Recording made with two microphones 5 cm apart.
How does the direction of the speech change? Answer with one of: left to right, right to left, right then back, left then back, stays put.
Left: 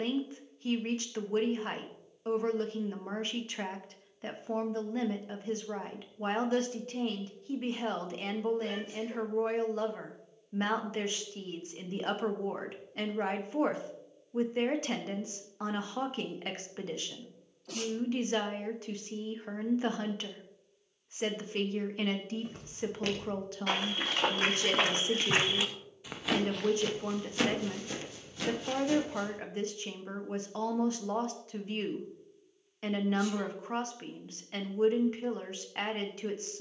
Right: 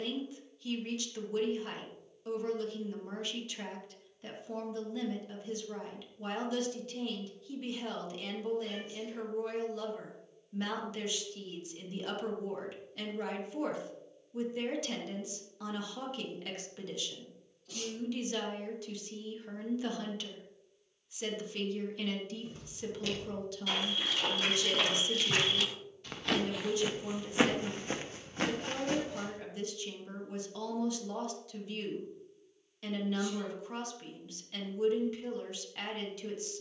stays put.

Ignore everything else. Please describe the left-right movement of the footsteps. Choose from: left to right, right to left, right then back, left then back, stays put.
left to right.